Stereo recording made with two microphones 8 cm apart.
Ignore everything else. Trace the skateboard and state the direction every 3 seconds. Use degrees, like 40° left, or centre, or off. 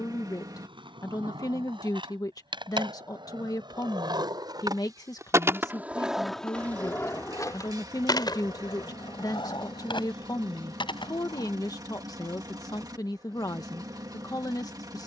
80° right, 50° right, 30° left, 70° left, off.